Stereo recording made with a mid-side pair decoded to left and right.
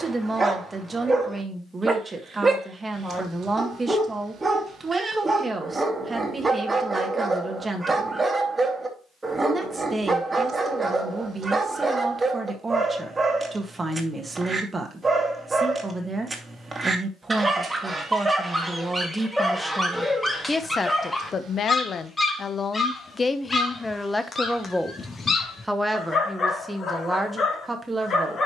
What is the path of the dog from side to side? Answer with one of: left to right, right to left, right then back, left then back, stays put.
right to left.